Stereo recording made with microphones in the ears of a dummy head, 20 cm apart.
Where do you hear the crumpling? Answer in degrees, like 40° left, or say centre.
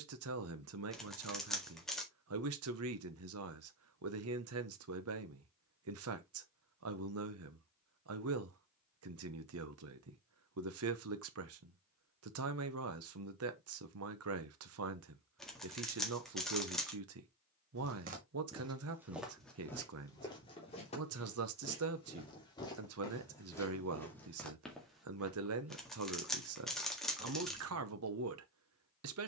centre.